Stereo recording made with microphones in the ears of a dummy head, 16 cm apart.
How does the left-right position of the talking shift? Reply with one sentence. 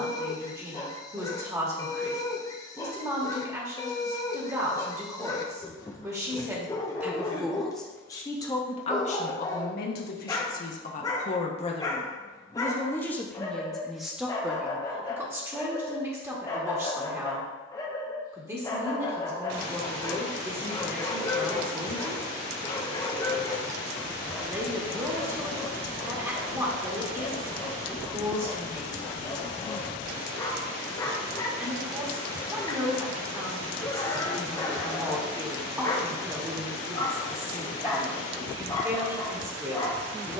In this clip you hear the talking move from right to left and back again.